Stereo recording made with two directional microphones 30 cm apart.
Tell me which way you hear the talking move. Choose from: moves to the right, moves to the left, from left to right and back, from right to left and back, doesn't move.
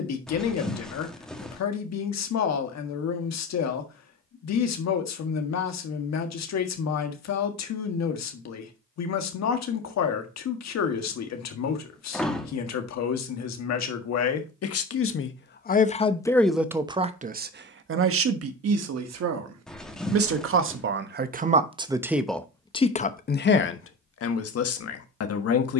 from left to right and back.